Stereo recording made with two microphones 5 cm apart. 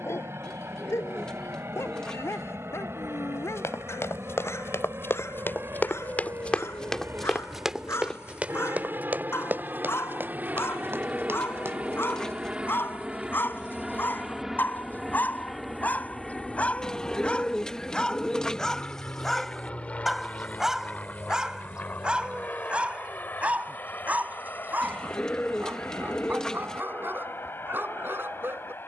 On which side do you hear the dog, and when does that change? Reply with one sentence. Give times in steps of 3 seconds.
In this clip you hear the dog on the left from 0 s, in the centre from 18 s and on the right from 21 s.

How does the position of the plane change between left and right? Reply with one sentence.
You can hear the plane move from right to left.